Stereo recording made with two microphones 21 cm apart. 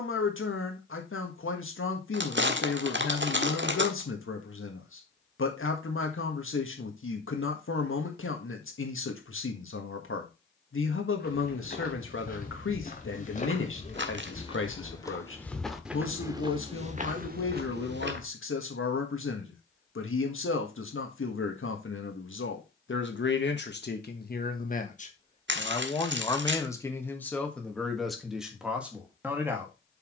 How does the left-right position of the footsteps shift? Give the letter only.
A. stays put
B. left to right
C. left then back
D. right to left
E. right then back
B.